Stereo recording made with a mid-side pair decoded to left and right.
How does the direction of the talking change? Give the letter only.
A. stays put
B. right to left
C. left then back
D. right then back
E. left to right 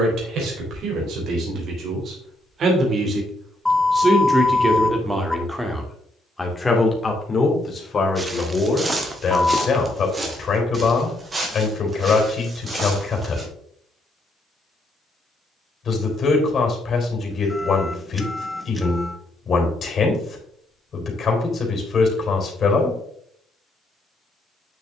B.